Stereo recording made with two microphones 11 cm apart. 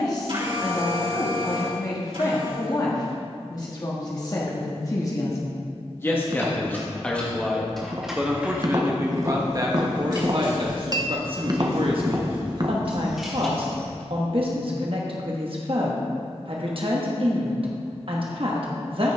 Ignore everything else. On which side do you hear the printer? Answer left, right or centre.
right.